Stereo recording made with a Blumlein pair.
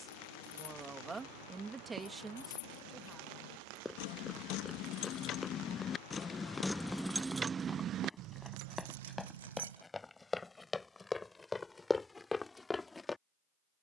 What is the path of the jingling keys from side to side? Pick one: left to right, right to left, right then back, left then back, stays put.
left to right.